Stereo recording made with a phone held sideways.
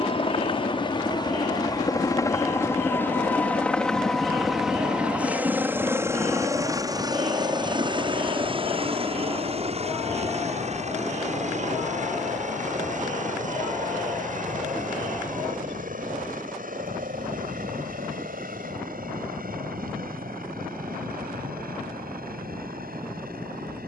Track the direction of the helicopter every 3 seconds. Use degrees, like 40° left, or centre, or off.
30° left, centre, 30° right, 50° right, 60° right, 60° right, 70° right, 70° right.